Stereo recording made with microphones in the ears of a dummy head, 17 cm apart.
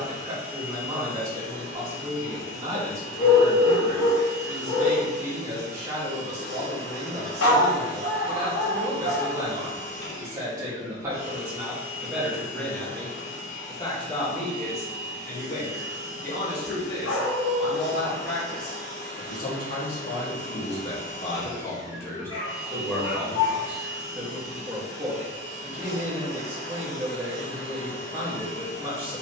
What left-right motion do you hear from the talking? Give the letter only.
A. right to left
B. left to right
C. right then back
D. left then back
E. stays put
D.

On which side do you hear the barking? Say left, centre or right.
left.